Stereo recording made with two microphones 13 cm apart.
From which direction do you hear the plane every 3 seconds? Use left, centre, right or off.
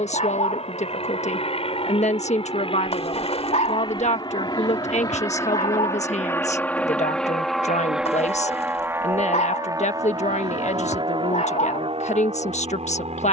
left, left, centre, right, right.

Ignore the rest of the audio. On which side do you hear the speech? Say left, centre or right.
left.